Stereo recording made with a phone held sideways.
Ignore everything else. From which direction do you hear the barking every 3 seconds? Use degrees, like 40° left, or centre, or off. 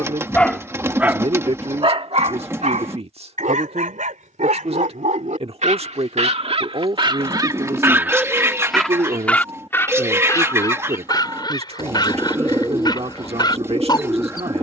30° right, 70° right, 30° right, 20° left, 30° left.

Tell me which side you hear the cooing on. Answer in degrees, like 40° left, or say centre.
20° right.